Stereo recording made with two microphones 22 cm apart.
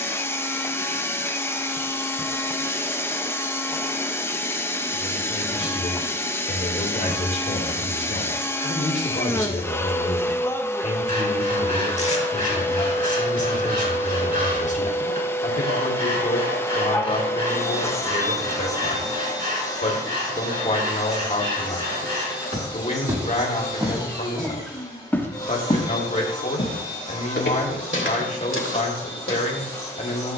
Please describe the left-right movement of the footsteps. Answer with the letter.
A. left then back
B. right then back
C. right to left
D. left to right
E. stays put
C.